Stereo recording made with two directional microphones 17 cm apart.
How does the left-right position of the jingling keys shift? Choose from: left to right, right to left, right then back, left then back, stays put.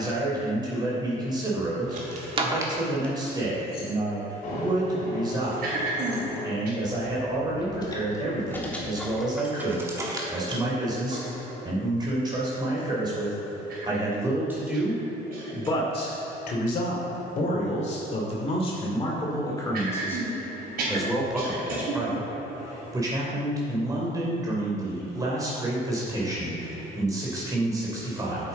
left then back.